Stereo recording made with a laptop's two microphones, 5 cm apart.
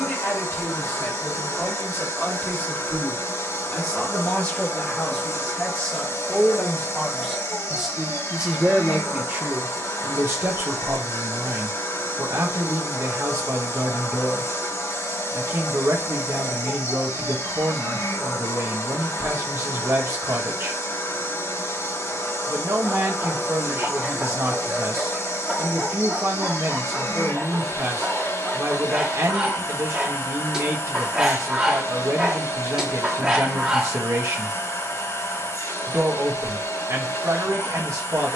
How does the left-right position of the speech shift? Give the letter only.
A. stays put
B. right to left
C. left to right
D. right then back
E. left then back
C.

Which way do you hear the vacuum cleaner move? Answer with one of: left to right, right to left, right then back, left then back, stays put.
stays put.